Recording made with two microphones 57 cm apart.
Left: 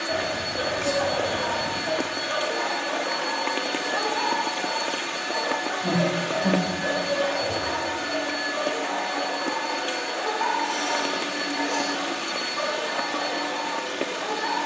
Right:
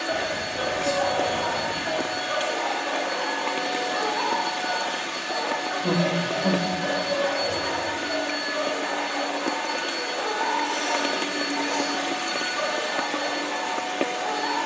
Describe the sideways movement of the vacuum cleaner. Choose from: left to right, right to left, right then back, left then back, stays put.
stays put.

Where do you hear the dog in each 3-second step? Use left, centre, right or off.
left, centre, right, right, right.